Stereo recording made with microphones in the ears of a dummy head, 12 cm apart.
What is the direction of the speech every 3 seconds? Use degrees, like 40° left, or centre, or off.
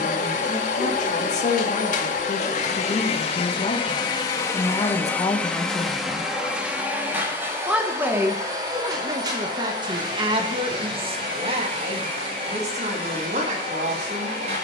60° left, 30° left, 10° right, 40° right, 50° right.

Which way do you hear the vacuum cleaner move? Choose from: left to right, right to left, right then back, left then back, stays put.
left to right.